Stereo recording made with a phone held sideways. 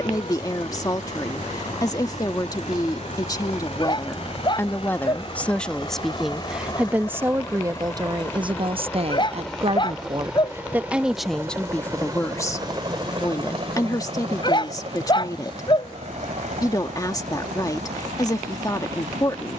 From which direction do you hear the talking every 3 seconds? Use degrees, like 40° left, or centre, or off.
30° left, 20° left, 20° right, 20° right, 20° left, 30° left, 30° left.